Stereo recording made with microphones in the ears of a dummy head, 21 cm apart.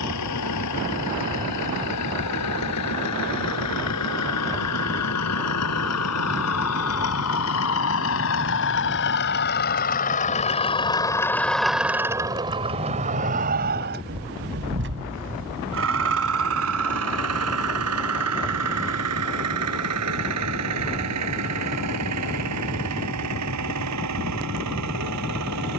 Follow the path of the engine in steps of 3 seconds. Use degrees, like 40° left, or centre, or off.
80° left, 80° left, 60° left, 30° left, 40° right, 60° right, 70° right, 80° right, 80° right.